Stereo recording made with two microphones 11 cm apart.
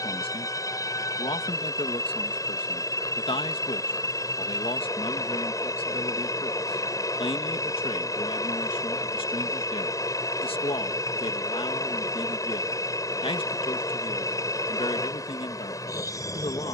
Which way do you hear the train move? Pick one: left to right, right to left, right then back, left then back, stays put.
stays put.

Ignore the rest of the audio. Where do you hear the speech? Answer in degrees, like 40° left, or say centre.
60° left.